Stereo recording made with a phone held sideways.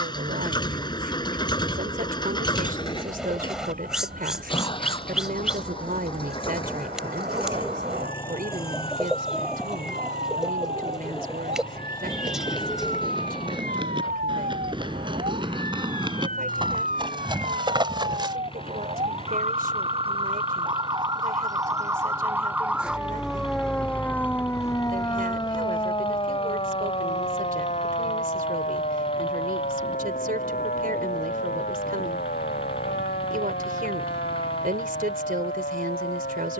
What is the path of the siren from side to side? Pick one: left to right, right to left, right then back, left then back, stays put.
right to left.